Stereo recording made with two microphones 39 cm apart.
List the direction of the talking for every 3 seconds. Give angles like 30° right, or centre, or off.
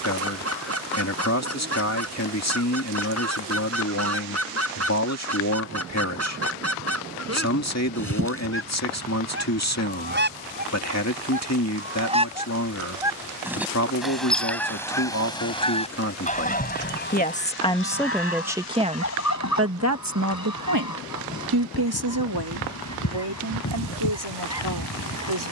40° left, 40° left, 40° left, 40° left, 40° left, 30° left, 30° right, 70° right, 80° right.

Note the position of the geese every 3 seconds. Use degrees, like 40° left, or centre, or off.
40° right, 40° right, 40° right, 30° right, centre, 20° left, 40° left, 50° left, 50° left.